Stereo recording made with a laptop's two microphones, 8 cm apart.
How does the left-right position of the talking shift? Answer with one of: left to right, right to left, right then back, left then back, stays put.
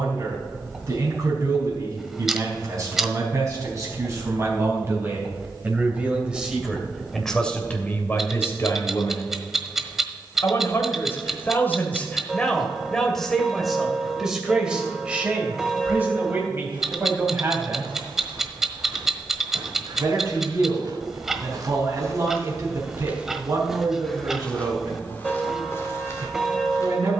left then back.